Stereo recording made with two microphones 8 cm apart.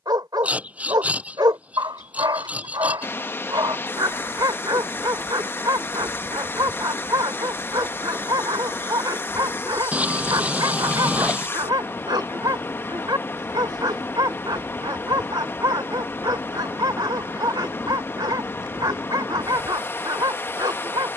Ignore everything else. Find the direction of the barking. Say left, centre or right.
right.